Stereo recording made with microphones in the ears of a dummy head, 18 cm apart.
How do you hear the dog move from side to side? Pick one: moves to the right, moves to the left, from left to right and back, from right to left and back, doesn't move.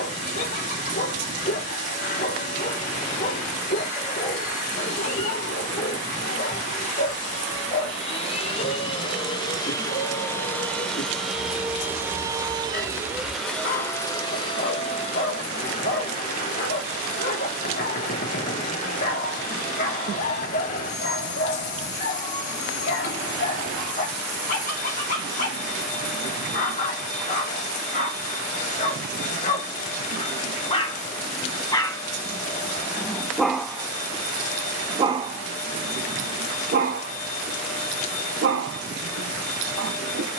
moves to the right.